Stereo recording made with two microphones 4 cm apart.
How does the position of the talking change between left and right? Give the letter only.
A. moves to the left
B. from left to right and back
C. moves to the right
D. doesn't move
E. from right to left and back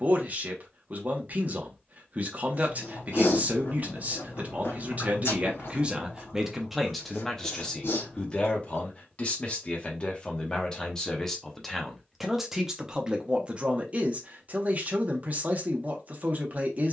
E.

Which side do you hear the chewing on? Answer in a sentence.
In this clip you hear the chewing on the left.